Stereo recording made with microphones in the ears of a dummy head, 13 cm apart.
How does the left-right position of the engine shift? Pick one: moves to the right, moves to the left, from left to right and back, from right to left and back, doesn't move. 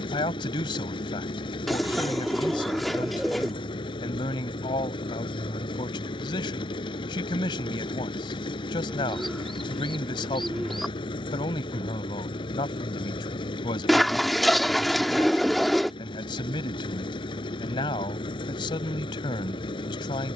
doesn't move.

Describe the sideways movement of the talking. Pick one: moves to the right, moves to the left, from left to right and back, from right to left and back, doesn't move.
doesn't move.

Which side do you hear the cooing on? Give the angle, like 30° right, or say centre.
centre.